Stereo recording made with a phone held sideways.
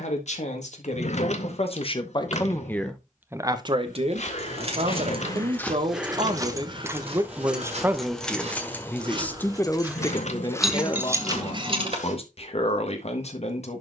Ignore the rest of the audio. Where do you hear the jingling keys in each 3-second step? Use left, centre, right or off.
off, right, centre, centre, off.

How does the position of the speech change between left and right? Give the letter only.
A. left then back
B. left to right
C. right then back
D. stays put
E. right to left
C.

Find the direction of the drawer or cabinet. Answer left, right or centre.
left.